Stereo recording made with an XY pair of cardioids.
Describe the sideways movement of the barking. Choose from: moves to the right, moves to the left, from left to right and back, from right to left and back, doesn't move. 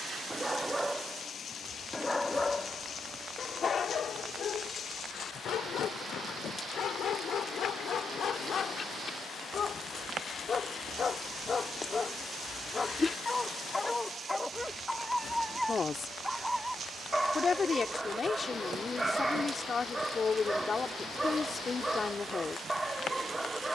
from right to left and back.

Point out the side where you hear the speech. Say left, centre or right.
left.